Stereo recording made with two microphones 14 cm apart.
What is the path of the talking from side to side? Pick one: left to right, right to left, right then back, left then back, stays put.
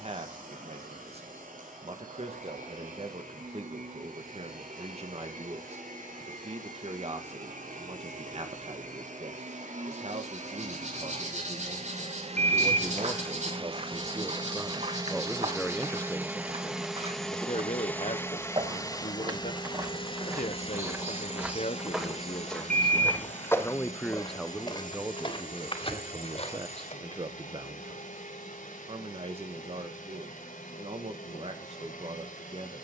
left then back.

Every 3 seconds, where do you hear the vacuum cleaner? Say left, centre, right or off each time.
right, right, right, right, right, centre, left, left, left, left, left.